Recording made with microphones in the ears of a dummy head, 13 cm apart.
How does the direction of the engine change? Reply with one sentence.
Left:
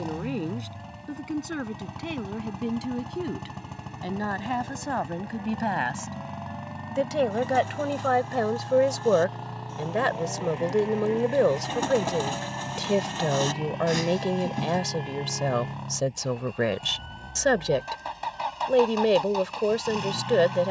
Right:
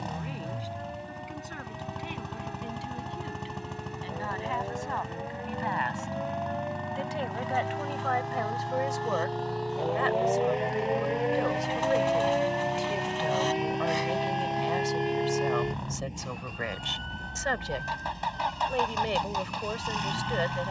You can hear the engine stay in one place.